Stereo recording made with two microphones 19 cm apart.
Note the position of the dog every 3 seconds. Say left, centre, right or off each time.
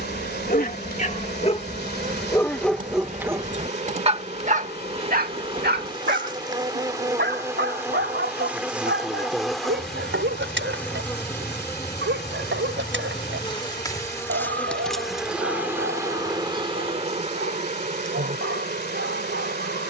left, right, right, right, right, right, right.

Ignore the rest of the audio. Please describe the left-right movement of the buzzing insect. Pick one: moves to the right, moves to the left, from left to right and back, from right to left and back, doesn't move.
from right to left and back.